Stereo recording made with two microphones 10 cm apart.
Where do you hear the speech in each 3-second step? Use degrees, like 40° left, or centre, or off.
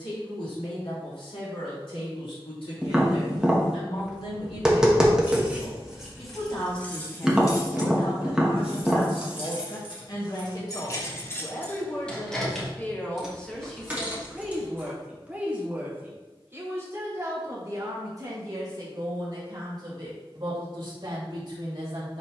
80° left, 70° left, 60° left, 40° left, 10° left, 30° right, 40° right, 50° right.